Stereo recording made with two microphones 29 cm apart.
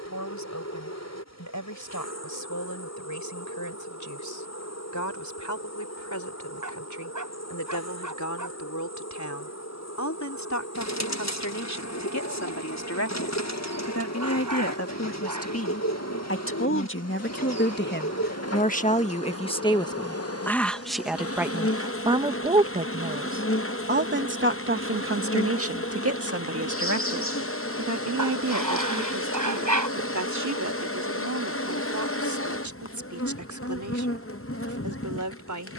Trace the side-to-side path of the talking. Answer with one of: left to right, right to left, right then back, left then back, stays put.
left to right.